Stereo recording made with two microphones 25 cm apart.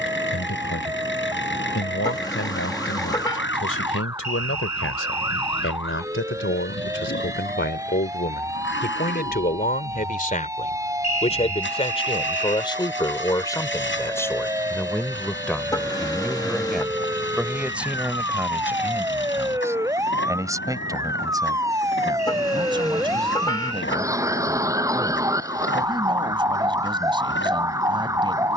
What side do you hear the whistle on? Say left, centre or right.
left.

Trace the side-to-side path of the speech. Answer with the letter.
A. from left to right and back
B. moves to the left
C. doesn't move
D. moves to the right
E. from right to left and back
D.